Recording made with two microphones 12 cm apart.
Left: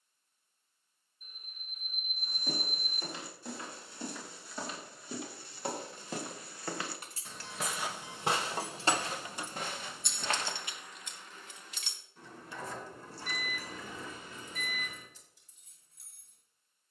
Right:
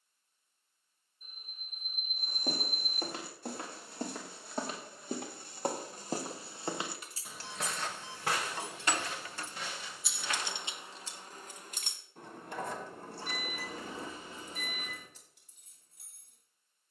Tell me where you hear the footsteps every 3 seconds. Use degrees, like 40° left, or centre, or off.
70° right, 60° right, centre, 50° left, off, off.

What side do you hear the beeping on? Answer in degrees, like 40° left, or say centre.
30° right.